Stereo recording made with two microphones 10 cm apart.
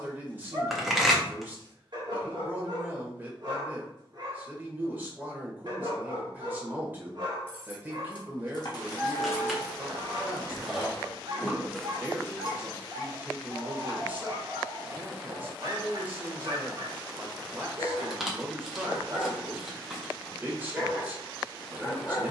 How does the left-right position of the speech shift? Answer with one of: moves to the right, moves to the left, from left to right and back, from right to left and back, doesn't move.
doesn't move.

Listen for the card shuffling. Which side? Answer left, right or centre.
centre.